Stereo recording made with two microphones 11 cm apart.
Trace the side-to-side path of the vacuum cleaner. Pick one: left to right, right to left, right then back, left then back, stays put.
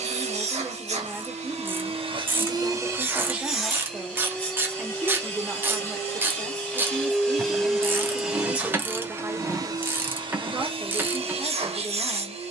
left then back.